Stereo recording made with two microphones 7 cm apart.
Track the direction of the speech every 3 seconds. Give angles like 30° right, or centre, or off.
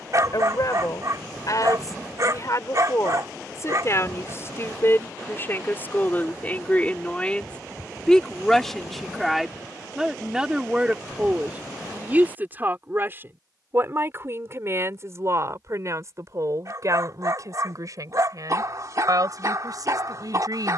50° left, 40° left, 10° left, 10° right, 30° right, 50° right, 60° right.